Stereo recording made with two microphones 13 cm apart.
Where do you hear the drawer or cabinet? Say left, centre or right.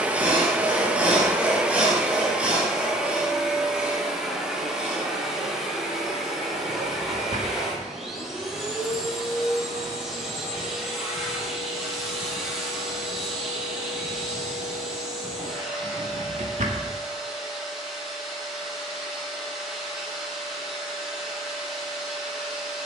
right.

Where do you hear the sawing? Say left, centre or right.
centre.